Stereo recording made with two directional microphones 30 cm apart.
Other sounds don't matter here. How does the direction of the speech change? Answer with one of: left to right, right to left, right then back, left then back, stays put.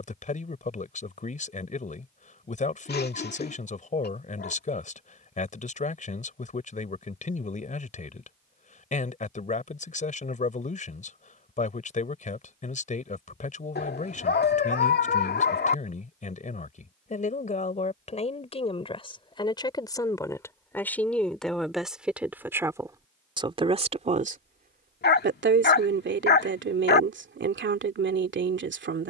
left to right.